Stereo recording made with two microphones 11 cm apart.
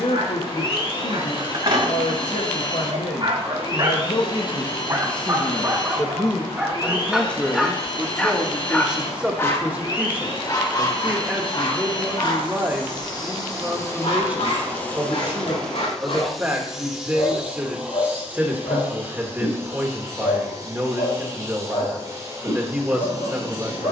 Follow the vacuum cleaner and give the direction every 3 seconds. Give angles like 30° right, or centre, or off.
40° left, 40° left, 40° left, 40° left, 30° left, centre, 20° right, 30° right.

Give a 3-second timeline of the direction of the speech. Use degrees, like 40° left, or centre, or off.
70° left, 50° left, 10° left, 10° right, 20° right, 20° right, 20° right, 20° right.